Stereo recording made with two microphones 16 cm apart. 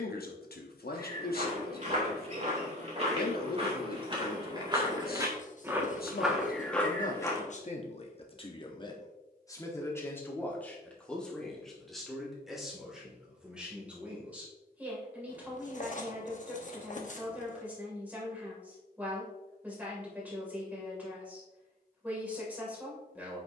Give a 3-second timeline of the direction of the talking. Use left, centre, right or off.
left, left, left, centre, centre, centre, centre, centre.